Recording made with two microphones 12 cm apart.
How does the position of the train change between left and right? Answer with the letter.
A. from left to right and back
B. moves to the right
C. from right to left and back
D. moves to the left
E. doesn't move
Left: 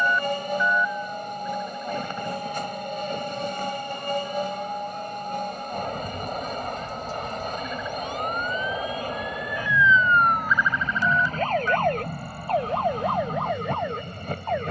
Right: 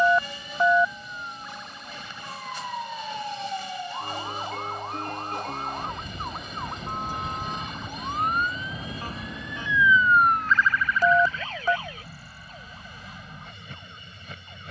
E.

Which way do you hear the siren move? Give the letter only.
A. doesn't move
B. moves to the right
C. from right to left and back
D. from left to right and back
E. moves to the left
E.